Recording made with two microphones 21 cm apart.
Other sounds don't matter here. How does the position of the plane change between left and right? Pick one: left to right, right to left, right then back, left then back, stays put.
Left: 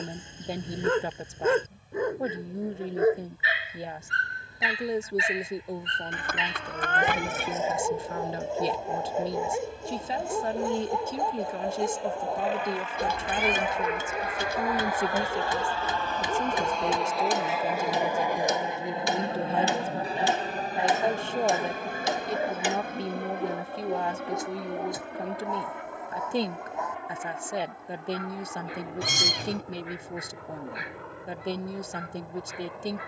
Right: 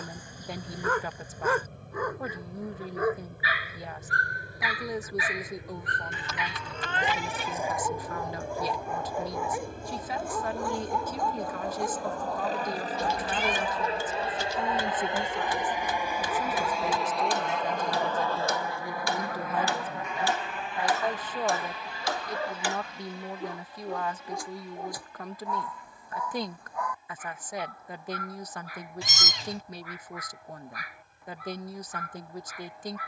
right to left.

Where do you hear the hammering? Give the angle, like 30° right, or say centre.
20° left.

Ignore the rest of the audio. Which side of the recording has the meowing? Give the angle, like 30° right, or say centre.
60° left.